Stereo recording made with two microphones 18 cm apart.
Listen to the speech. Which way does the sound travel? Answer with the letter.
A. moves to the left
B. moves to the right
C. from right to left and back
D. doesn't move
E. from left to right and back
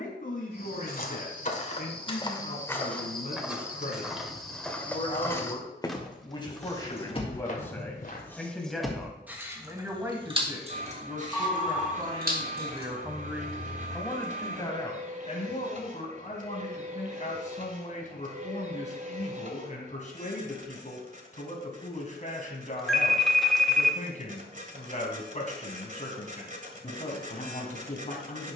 E.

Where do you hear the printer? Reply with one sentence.
In this clip you hear the printer on the right.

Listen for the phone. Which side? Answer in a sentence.
You can hear the phone in the centre.